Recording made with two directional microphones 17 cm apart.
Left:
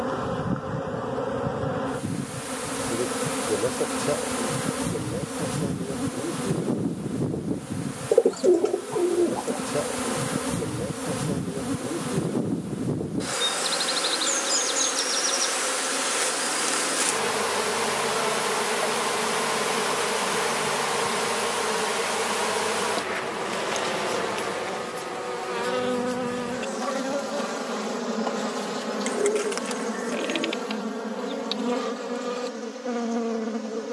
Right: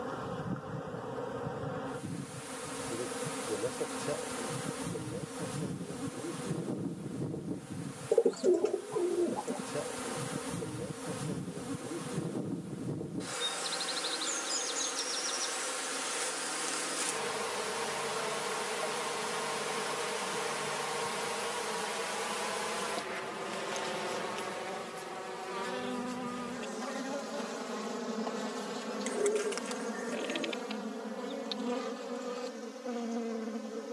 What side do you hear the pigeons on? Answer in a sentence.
You can hear the pigeons on the left.